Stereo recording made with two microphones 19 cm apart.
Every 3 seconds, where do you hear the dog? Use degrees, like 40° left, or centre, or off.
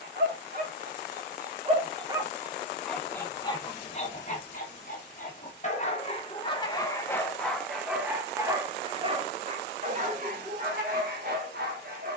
30° right, 30° left, centre, 50° right.